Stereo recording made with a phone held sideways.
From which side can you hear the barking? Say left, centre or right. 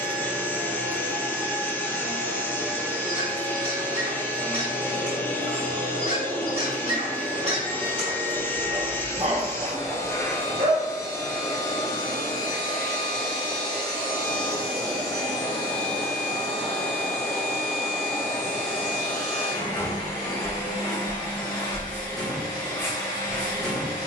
right.